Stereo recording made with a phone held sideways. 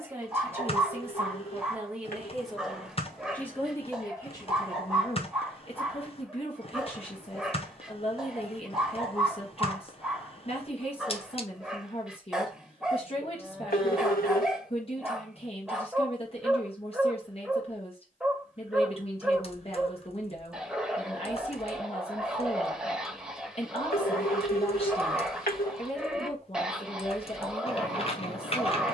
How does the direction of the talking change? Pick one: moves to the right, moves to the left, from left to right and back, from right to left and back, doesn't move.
moves to the left.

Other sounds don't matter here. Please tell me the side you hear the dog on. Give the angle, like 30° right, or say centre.
centre.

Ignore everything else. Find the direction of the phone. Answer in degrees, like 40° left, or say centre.
80° left.